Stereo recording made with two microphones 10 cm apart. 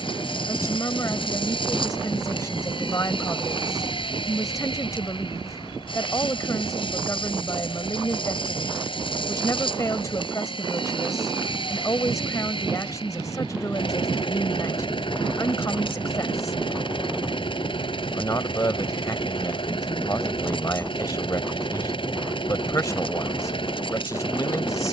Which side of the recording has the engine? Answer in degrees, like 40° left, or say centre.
50° left.